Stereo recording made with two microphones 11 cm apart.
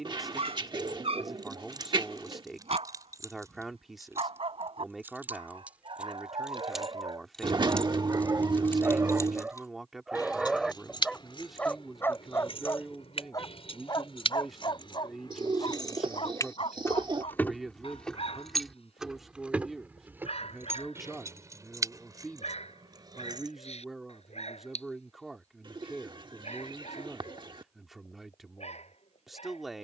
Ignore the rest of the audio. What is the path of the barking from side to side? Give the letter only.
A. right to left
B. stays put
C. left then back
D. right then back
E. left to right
A.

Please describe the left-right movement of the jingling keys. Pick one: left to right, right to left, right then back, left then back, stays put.
left then back.